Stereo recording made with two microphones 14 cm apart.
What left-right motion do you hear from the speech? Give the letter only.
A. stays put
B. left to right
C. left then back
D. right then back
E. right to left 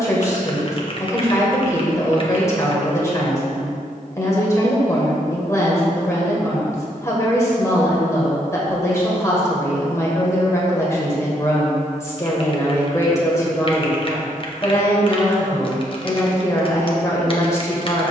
A.